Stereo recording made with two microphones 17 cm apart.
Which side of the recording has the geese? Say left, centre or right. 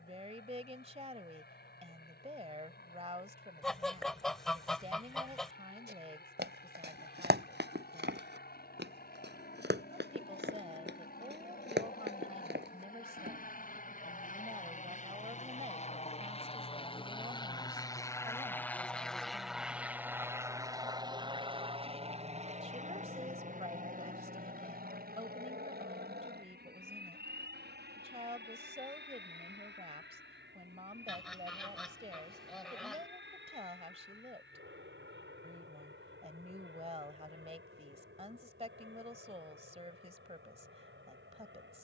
centre.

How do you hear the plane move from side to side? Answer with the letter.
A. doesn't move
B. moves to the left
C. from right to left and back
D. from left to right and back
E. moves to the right
E.